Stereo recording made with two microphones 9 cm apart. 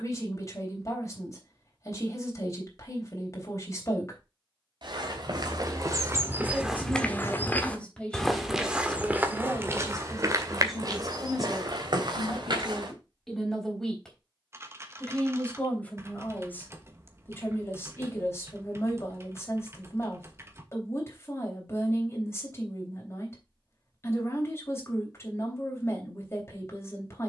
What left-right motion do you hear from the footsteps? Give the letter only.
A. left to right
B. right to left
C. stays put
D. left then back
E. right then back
D.